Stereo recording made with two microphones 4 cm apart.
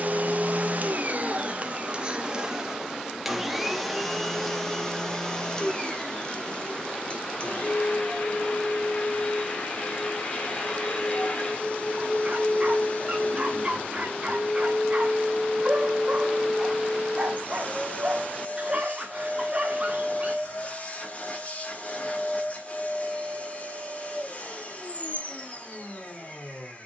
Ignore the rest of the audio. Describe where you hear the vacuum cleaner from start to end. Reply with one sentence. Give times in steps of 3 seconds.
You can hear the vacuum cleaner on the right from 0 s, in the centre from 3 s and on the left from 6 s.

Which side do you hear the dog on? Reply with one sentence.
In this clip you hear the dog on the right.